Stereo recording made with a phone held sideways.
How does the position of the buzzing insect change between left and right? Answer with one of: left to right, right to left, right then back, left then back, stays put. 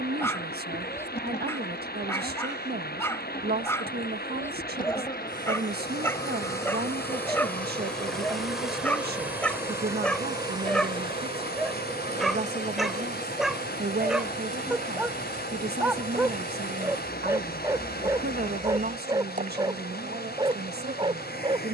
left to right.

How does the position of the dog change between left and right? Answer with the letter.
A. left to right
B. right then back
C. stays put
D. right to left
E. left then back
A.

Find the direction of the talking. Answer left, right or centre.
right.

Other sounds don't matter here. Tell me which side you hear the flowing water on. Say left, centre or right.
left.